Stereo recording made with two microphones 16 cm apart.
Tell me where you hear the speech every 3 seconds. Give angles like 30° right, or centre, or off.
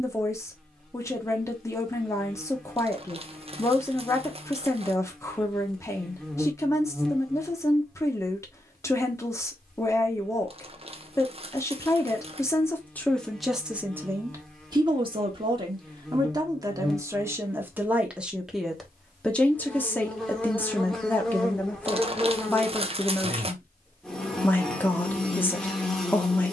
20° left, 20° left, 20° left, 20° left, centre, 20° right, 10° left, 10° left, 10° left.